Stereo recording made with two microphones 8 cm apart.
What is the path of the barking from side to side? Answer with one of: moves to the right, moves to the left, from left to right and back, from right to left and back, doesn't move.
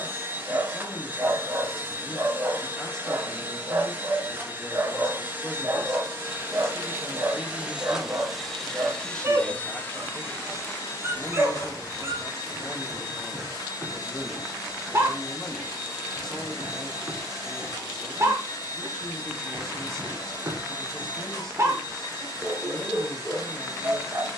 doesn't move.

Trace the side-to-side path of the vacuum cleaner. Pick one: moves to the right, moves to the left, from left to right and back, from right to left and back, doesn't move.
moves to the left.